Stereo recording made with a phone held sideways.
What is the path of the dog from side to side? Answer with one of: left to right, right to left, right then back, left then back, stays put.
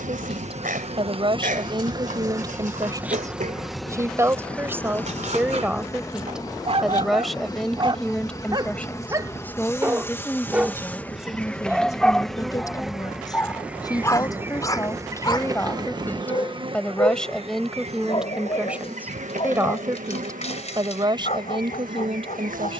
right to left.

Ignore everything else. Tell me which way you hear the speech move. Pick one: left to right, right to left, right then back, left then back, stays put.
left then back.